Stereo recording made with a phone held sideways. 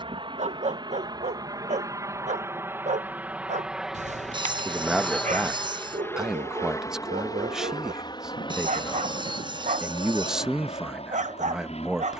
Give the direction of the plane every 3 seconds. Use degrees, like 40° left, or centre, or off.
30° right, centre, 30° left, 40° left.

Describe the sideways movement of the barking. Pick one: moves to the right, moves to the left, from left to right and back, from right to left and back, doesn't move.
doesn't move.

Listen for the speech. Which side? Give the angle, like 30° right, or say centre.
centre.